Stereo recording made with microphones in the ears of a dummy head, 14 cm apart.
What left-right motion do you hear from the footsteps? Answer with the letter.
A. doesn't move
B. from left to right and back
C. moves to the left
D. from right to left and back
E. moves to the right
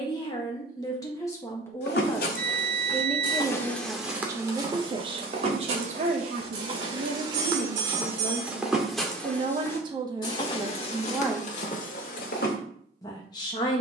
B.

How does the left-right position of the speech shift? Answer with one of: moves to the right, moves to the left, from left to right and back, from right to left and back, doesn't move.
from left to right and back.